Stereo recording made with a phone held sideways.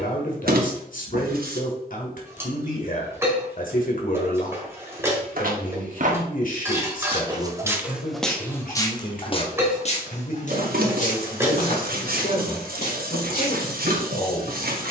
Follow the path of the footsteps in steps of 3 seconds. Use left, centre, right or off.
off, right, centre, left, left.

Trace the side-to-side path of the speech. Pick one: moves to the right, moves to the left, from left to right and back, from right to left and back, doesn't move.
doesn't move.